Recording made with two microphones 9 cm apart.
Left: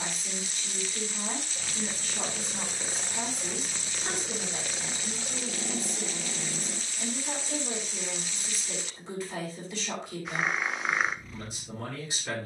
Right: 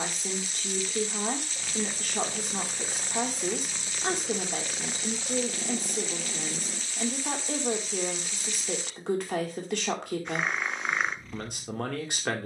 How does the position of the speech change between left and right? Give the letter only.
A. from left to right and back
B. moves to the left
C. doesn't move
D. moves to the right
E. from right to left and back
C.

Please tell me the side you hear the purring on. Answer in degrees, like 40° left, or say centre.
centre.